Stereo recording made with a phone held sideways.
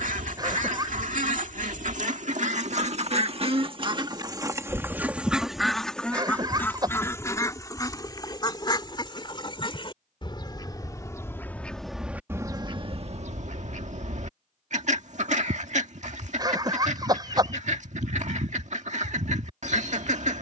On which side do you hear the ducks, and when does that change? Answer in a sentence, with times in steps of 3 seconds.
You can hear the ducks on the right from 0 s, on the left from 6 s and on the right from 12 s.